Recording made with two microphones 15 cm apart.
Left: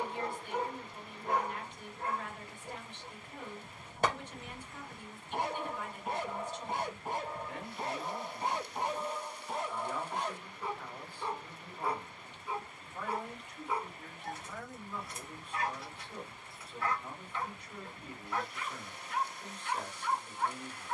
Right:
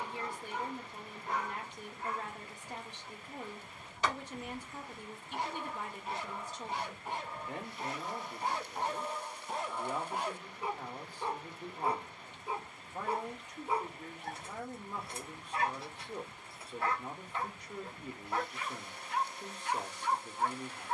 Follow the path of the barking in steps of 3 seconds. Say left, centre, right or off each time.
left, left, left, centre, right, right, right.